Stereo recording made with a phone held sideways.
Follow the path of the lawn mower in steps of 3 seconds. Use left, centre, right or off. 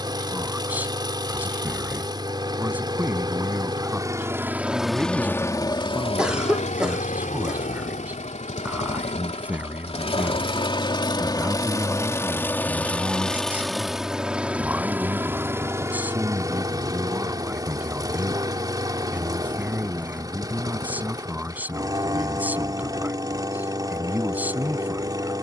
right, centre, left, left, centre, right, right, right, right.